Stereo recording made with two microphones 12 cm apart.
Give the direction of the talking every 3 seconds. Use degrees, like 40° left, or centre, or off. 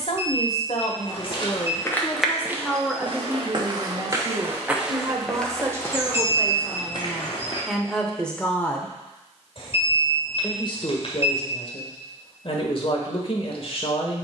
40° left, 20° right, centre, 50° left, 50° left.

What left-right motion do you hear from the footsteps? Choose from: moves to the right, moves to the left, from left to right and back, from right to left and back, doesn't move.
from left to right and back.